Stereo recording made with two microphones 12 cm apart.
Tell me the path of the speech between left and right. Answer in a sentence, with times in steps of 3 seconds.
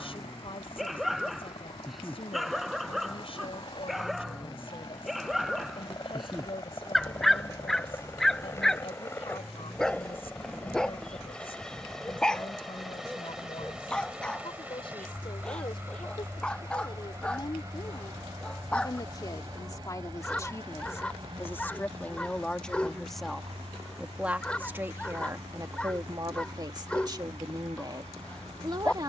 In this clip you hear the speech on the left from 0 s, in the centre from 21 s and on the right from 24 s.